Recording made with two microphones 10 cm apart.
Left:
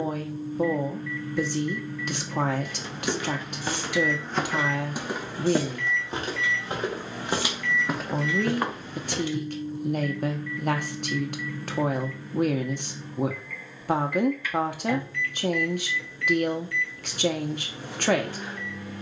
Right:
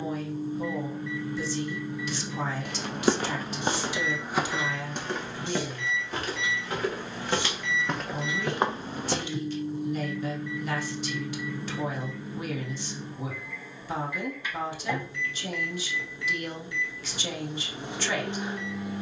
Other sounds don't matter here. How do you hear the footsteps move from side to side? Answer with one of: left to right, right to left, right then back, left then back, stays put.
left then back.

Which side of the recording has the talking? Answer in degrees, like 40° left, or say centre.
60° left.